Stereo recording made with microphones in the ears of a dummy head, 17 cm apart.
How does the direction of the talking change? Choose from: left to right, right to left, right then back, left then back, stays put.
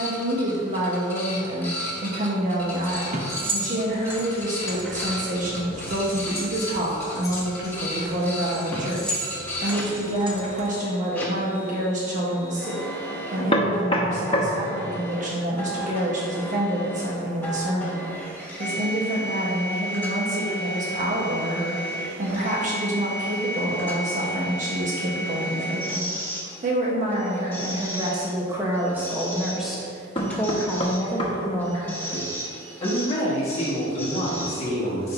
right to left.